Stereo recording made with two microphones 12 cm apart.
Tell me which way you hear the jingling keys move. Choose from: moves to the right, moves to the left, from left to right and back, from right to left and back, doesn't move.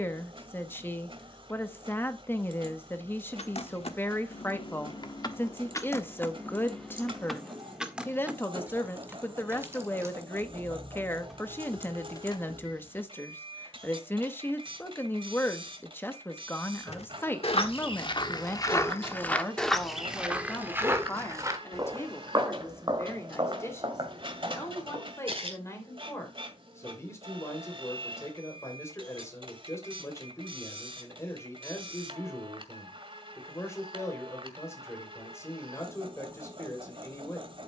from left to right and back.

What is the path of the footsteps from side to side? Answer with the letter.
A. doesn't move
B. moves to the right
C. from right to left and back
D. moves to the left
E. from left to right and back
B.